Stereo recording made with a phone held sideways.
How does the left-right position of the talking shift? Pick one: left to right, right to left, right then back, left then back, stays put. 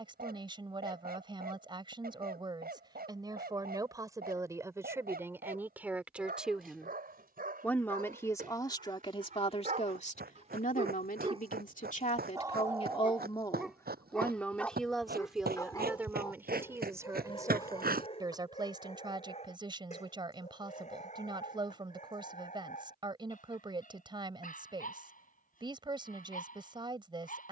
left then back.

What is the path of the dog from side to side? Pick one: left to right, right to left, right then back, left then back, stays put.
right to left.